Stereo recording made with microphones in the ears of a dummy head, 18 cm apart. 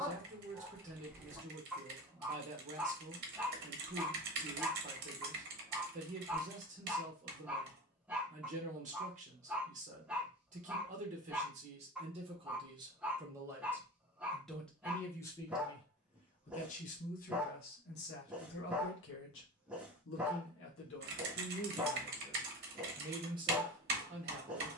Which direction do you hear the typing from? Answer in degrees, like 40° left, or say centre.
50° right.